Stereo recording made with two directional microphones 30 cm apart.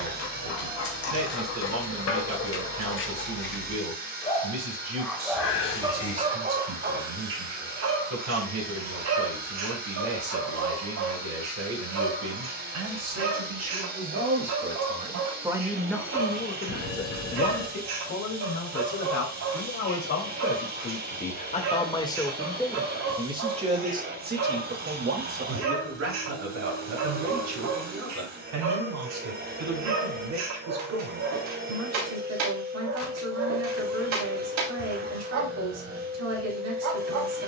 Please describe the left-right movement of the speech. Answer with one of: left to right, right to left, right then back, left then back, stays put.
left then back.